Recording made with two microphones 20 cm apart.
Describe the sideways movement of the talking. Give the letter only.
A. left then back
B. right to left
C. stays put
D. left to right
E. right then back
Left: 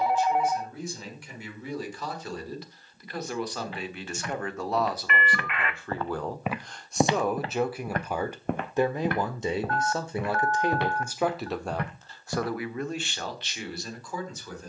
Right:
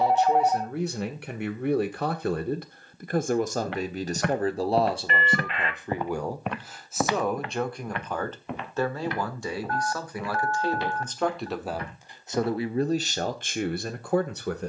A.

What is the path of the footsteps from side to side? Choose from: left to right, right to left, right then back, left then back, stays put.
right to left.